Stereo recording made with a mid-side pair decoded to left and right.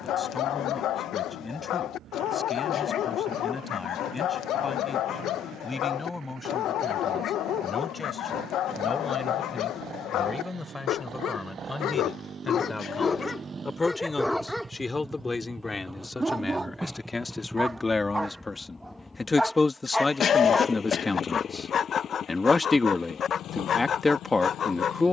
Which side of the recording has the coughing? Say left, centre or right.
left.